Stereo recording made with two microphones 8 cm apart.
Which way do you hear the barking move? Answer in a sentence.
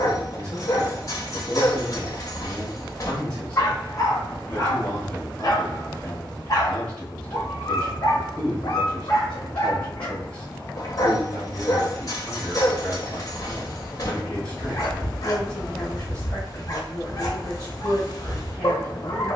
In this clip you hear the barking stay in one place.